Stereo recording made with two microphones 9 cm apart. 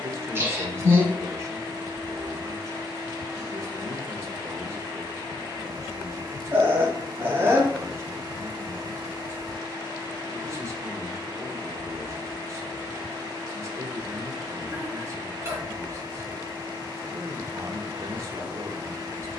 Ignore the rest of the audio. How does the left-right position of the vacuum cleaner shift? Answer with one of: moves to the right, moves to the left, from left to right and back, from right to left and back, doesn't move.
doesn't move.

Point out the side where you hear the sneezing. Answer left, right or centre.
right.